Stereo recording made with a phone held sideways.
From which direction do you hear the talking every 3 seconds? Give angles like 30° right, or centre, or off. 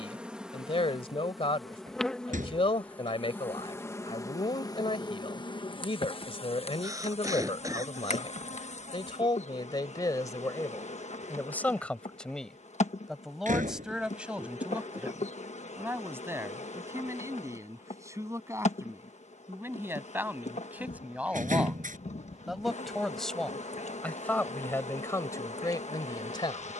40° left, 40° left, 40° left, 20° left, centre, 20° right, 20° right, centre, 20° left.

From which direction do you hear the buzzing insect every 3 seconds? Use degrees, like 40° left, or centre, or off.
centre, 30° left, 50° left, 60° left, 60° left, 60° left, 60° left, 60° left, 60° left.